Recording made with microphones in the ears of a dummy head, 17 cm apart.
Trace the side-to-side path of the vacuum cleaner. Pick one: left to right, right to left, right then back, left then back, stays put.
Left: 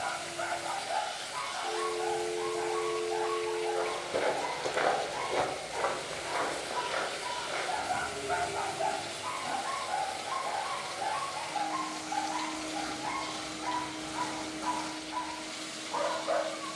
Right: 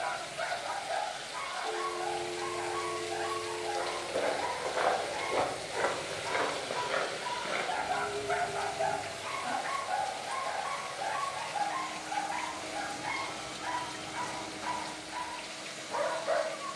right then back.